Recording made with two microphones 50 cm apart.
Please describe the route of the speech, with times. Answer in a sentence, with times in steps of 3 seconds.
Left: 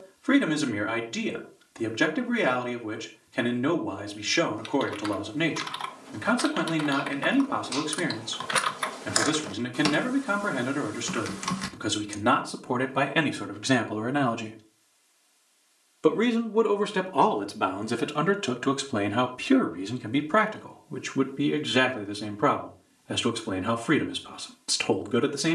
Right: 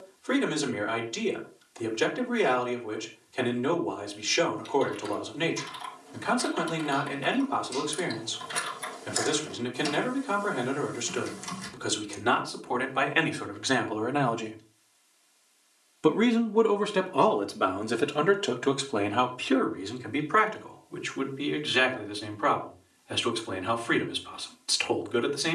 You can hear the speech on the left from 0 s, in the centre from 15 s and on the left from 18 s.